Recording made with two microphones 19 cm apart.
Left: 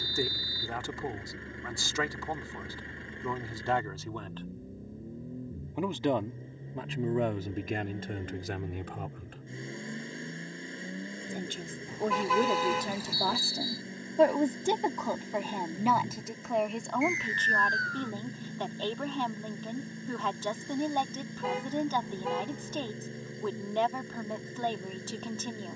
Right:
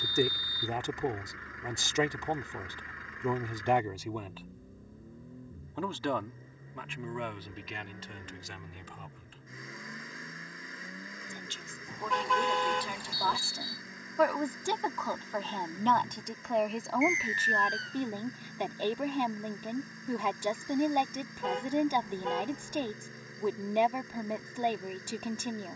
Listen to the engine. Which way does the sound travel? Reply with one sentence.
In this clip you hear the engine stay in one place.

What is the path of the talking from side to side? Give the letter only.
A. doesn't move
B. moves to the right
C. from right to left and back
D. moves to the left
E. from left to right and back
C.